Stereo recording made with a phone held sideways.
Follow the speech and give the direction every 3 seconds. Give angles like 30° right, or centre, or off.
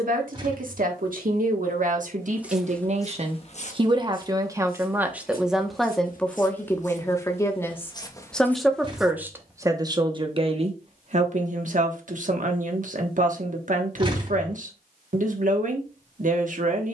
60° right, 20° right, 10° left, 40° right, 60° right, 60° right.